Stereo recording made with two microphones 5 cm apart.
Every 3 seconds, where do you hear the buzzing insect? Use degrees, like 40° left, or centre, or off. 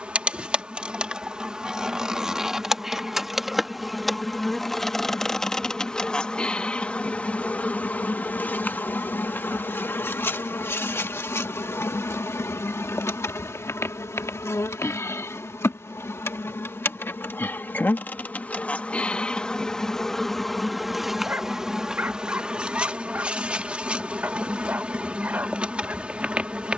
20° right, centre, 30° left, 50° left, 60° left, 50° left, 20° left, 20° right, 20° right.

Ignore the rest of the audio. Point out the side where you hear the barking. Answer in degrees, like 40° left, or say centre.
40° right.